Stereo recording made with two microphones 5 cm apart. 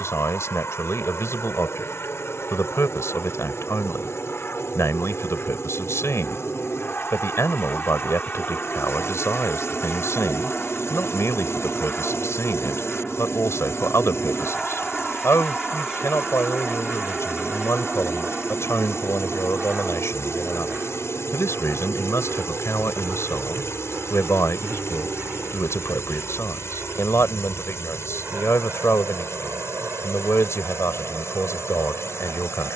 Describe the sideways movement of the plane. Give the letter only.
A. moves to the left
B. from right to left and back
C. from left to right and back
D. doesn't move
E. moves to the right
E.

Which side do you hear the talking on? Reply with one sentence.
You can hear the talking on the left.